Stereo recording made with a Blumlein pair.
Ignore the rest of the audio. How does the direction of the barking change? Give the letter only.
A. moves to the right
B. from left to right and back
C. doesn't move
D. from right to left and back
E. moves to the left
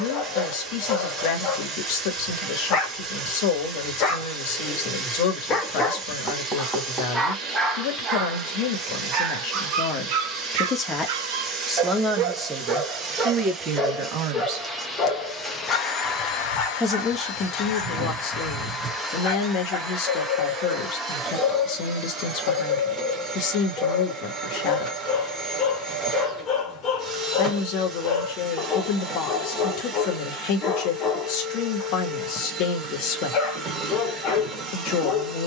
B.